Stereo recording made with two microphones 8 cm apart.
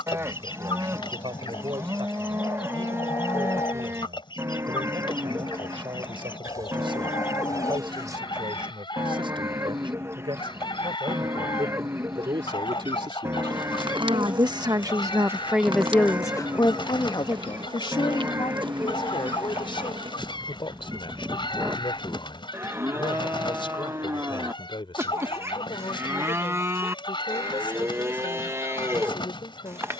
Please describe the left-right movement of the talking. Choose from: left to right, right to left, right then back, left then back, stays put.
right to left.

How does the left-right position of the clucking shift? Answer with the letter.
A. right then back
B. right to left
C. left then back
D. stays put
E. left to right
D.